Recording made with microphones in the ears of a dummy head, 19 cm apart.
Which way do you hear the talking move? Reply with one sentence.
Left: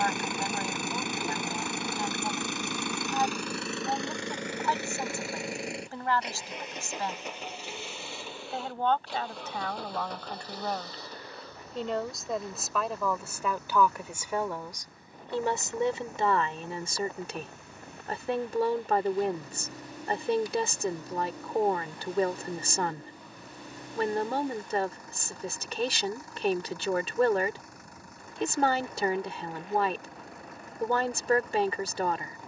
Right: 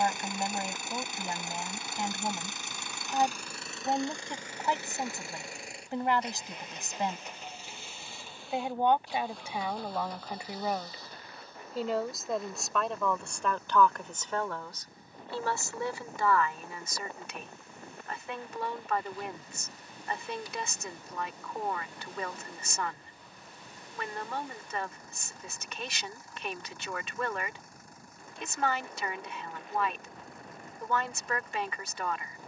In this clip you hear the talking travel towards the left.